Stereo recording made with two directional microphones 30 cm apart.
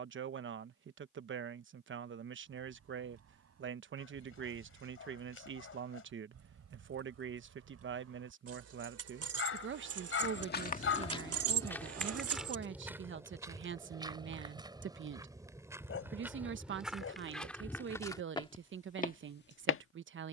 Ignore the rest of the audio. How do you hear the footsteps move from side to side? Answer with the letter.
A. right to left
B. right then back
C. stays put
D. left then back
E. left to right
B.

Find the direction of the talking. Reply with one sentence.
You can hear the talking on the right.